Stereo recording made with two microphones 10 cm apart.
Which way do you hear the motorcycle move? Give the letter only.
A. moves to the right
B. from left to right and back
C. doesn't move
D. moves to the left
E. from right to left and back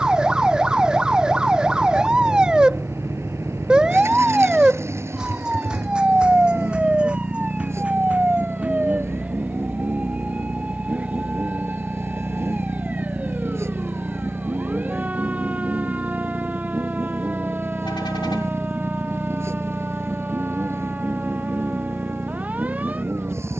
C.